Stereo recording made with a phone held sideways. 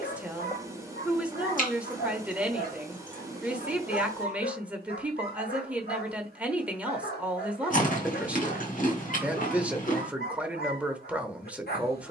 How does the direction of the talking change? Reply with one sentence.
You can hear the talking stay put.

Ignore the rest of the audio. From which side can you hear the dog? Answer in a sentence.
You can hear the dog on the left.